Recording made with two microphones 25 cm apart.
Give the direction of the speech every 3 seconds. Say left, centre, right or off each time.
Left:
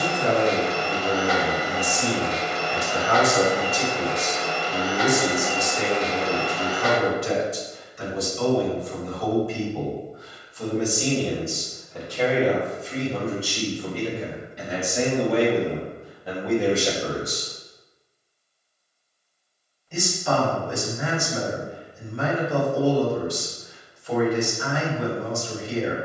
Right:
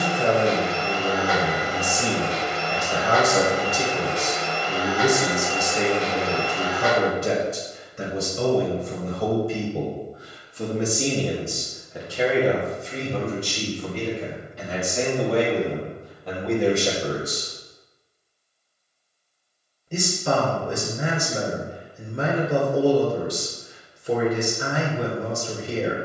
right, right, right, right, centre, centre, right, right, right.